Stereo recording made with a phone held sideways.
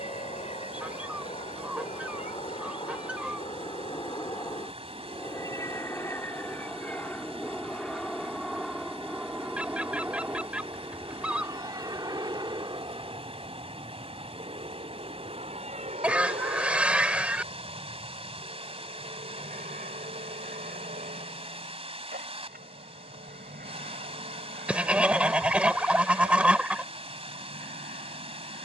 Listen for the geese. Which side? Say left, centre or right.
centre.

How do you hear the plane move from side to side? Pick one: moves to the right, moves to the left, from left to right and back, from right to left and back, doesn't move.
moves to the right.